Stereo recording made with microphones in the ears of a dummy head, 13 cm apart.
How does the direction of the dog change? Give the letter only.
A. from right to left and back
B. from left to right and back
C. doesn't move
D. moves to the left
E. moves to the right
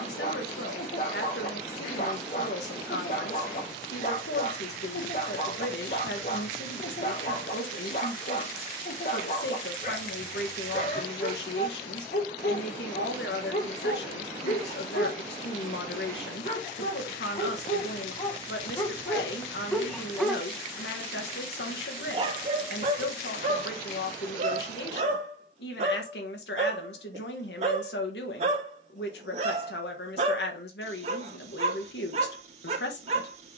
E.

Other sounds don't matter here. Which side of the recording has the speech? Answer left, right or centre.
left.